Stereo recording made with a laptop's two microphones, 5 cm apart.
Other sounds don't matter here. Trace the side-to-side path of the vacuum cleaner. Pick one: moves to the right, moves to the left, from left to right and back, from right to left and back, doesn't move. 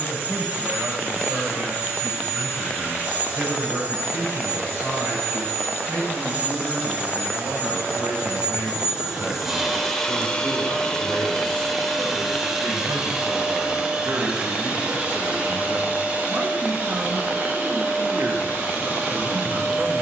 from right to left and back.